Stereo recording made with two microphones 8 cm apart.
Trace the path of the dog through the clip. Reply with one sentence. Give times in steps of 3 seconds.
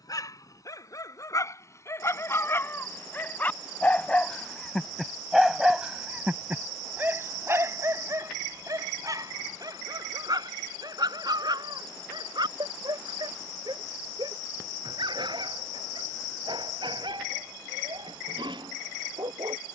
You can hear the dog on the left from 0 s, in the centre from 3 s and on the right from 6 s.